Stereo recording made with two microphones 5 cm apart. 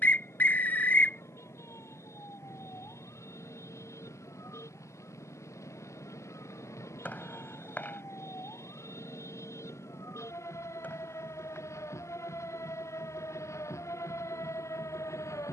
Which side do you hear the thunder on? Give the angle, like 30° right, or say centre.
70° left.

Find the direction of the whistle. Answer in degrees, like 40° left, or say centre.
30° left.